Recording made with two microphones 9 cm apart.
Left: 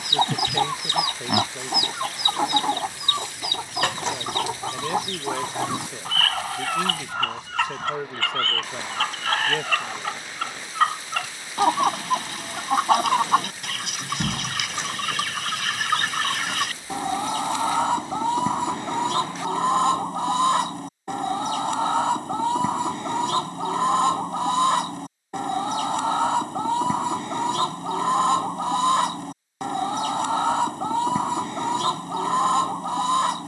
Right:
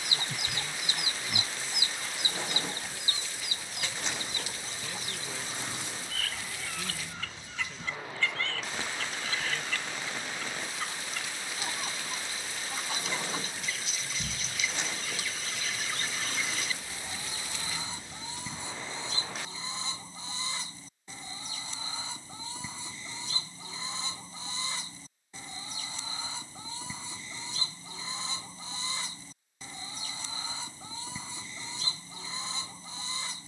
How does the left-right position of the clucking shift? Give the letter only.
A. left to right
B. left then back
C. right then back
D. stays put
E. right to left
D.